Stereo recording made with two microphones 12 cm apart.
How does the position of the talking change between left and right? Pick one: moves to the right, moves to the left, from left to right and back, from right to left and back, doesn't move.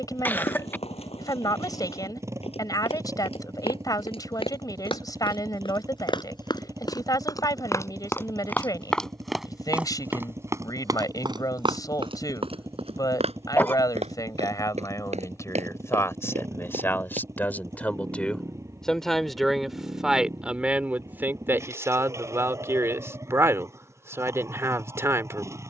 moves to the right.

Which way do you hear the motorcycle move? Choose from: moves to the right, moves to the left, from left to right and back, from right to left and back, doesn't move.
doesn't move.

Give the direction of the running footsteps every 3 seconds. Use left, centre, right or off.
left, left, left, right, right, right, off, off, off.